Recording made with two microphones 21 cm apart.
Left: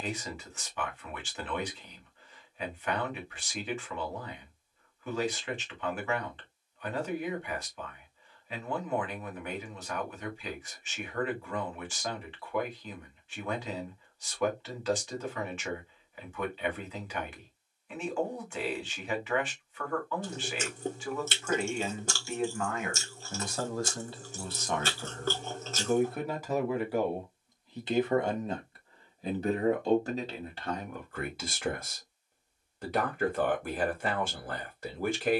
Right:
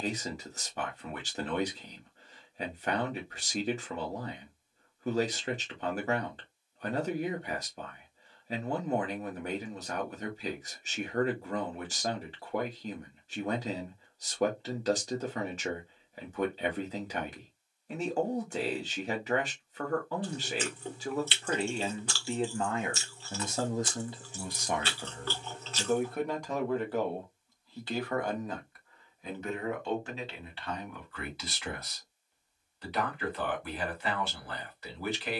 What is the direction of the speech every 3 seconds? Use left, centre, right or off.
right, right, right, right, right, right, right, right, centre, left, left, left.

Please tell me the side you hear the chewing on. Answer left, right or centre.
left.